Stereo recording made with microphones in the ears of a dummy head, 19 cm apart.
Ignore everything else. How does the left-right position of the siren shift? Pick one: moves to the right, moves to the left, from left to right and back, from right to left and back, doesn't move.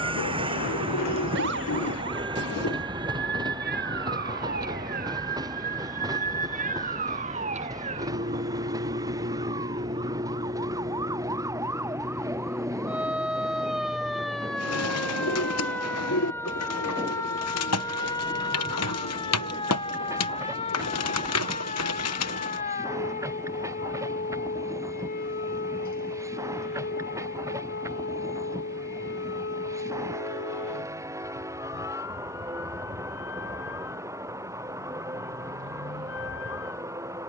moves to the left.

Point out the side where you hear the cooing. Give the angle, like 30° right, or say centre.
80° left.